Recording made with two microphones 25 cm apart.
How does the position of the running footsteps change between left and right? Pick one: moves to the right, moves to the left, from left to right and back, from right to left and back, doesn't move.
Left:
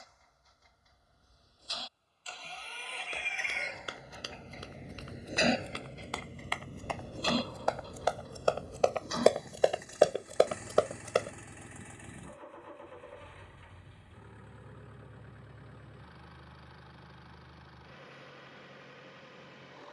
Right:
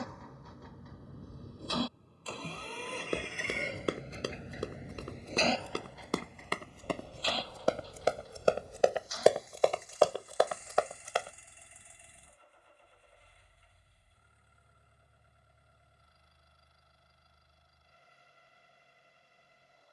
moves to the left.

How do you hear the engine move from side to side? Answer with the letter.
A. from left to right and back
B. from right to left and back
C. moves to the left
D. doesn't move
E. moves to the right
C.